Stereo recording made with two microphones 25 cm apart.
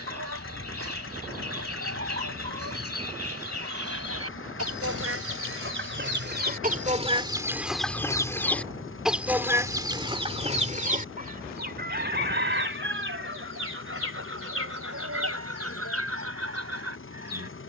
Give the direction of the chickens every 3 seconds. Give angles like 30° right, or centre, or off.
60° right, 60° right, 10° right, 20° right, 50° right, 60° right.